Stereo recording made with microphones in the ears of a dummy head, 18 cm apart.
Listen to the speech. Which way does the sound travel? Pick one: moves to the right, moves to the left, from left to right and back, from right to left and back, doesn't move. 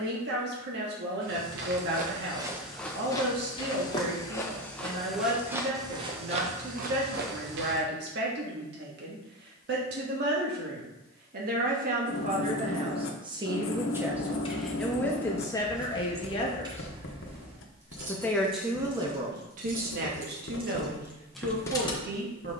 from right to left and back.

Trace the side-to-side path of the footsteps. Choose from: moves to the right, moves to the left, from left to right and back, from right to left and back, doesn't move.
from right to left and back.